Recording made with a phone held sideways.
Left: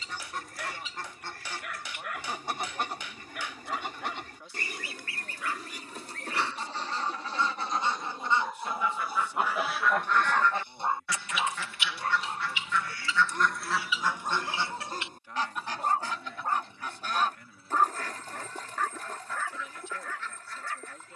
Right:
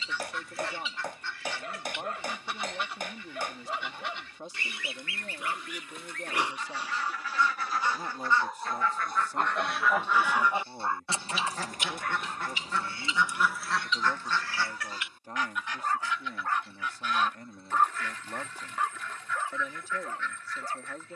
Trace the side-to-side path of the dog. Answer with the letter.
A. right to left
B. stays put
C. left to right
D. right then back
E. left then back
E.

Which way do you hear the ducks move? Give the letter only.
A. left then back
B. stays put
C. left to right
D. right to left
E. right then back
E.